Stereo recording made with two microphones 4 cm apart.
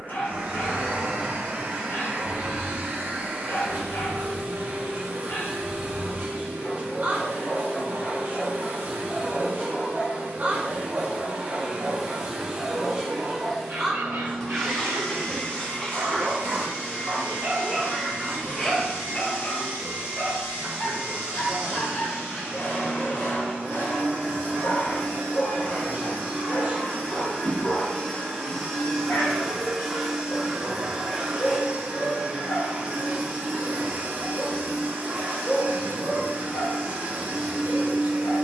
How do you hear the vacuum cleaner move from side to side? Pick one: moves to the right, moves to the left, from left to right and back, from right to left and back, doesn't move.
from right to left and back.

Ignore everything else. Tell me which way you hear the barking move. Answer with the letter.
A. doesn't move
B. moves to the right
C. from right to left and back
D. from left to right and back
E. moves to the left
D.